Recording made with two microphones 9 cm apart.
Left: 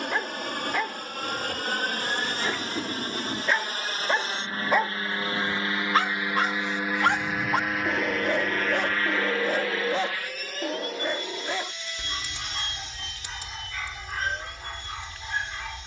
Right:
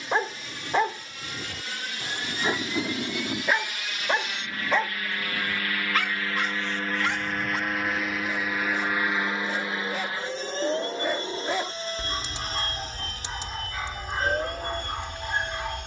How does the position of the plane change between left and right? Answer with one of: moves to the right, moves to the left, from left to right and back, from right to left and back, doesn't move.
moves to the right.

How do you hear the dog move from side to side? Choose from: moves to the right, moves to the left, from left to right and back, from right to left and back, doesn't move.
from right to left and back.